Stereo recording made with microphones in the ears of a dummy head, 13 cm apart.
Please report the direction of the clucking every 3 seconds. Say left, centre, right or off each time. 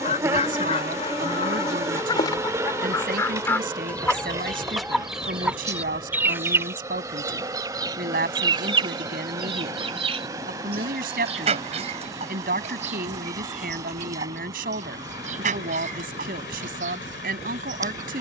left, centre, right, right, right, right.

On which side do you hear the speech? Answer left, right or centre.
right.